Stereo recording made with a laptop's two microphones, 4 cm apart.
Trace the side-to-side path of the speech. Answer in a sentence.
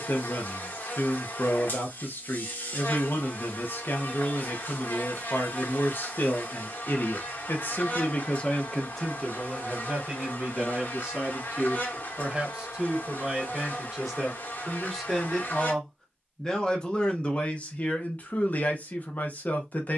You can hear the speech go right and come back.